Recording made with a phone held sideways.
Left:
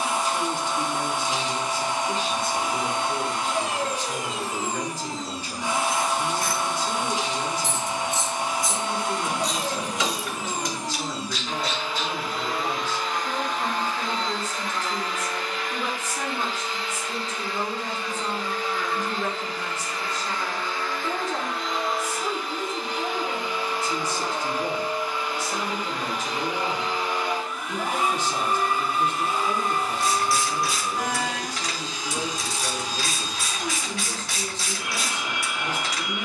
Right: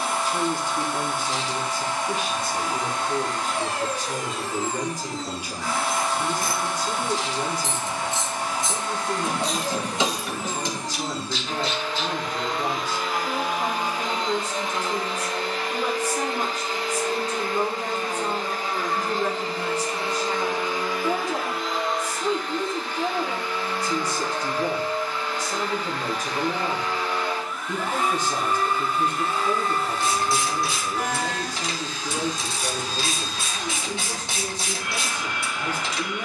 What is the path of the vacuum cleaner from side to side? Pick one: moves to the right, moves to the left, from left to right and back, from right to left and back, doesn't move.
from left to right and back.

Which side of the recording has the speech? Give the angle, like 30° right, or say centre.
10° right.